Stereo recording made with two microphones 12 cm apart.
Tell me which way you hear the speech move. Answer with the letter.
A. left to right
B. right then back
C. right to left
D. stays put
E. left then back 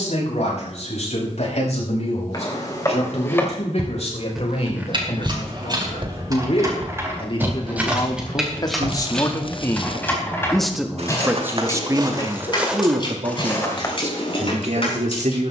A.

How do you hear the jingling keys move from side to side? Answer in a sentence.
In this clip you hear the jingling keys travel towards the left.